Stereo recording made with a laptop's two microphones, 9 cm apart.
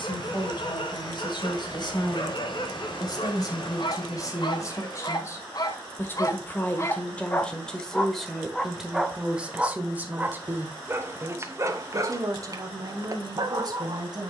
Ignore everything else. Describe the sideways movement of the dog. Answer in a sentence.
In this clip you hear the dog go from the left side to the right.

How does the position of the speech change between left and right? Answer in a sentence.
In this clip you hear the speech move to the right.